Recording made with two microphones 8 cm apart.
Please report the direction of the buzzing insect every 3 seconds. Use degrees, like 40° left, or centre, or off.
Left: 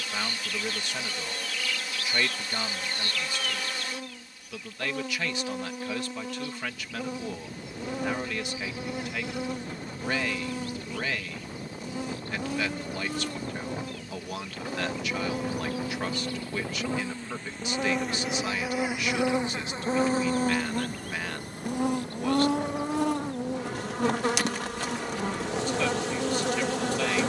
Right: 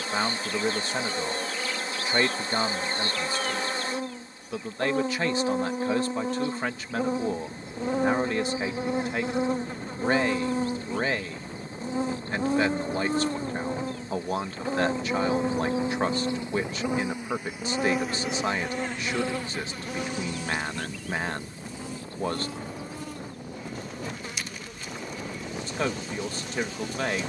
30° right, 30° right, 30° right, 30° right, 30° right, 20° right, 20° left, 70° left, 80° left.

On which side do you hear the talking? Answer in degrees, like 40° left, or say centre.
30° right.